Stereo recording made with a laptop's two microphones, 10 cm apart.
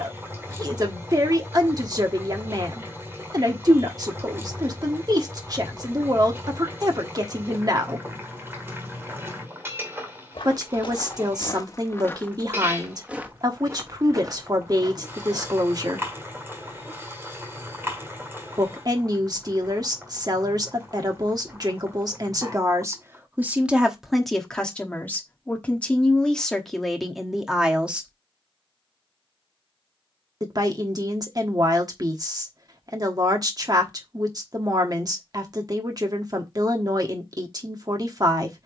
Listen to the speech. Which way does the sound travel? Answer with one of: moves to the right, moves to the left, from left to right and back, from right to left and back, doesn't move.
from right to left and back.